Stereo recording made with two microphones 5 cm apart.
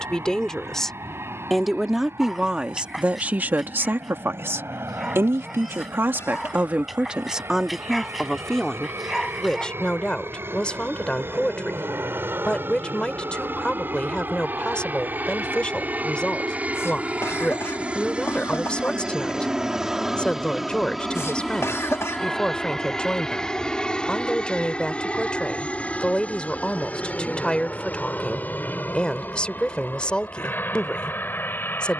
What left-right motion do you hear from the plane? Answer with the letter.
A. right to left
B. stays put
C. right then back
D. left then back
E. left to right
A.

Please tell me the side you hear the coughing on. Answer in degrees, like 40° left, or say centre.
80° left.